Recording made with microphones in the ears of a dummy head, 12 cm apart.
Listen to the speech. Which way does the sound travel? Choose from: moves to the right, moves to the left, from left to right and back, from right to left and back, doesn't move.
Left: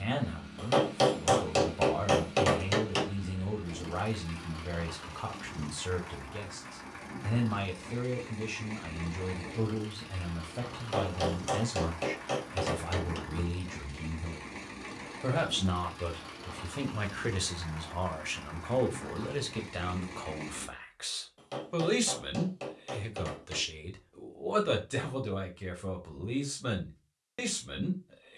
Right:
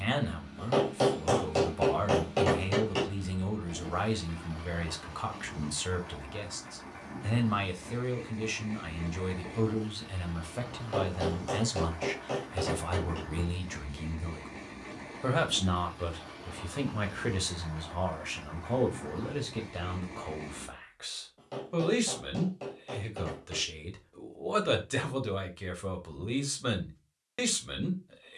from right to left and back.